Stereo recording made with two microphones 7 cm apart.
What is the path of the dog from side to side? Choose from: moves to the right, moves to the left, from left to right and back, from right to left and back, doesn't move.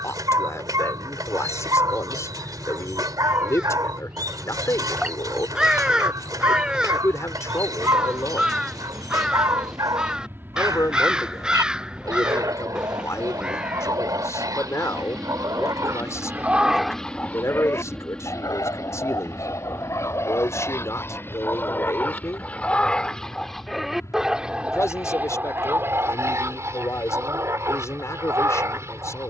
from right to left and back.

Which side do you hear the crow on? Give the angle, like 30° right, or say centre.
10° right.